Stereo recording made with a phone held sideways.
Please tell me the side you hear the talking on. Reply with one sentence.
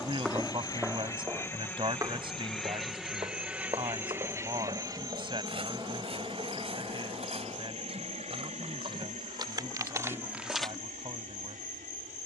You can hear the talking on the right.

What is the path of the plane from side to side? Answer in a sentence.
In this clip you hear the plane travel towards the right.